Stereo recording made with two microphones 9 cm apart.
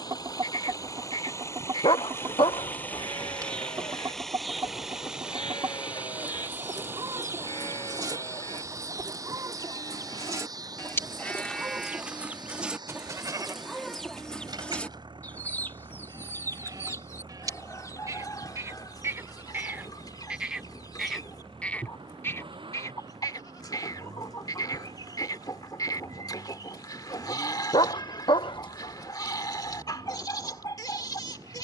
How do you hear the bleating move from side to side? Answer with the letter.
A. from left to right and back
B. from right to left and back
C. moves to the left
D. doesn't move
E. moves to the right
A.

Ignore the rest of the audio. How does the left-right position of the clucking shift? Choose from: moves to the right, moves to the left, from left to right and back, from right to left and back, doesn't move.
moves to the left.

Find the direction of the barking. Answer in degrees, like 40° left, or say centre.
60° left.